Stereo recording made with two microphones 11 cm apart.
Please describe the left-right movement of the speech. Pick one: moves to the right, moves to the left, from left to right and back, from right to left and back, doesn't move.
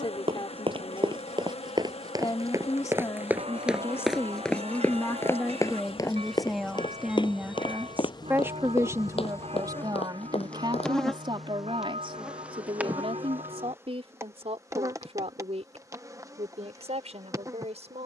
moves to the right.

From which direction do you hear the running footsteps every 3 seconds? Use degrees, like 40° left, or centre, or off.
40° right, 10° left, 50° left, 60° left, off, off.